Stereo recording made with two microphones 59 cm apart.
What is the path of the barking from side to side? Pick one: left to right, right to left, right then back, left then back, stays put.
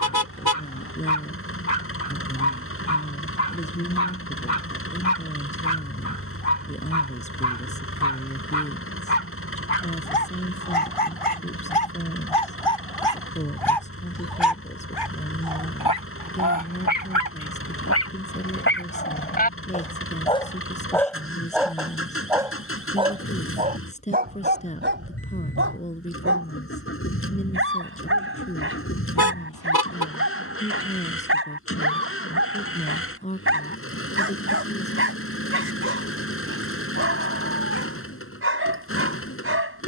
left to right.